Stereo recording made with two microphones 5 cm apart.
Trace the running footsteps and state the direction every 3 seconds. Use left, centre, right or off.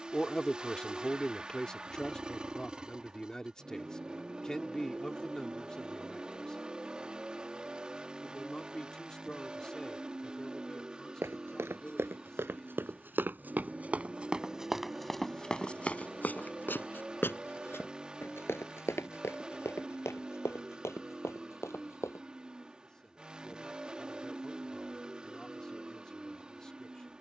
off, off, off, right, right, left, left, left, off.